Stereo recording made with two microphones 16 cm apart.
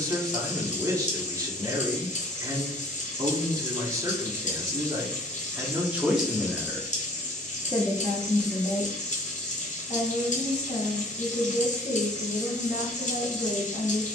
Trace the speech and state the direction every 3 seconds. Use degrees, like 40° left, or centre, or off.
20° right, 20° right, 20° left, 60° left, 60° left.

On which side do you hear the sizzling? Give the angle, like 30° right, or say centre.
50° left.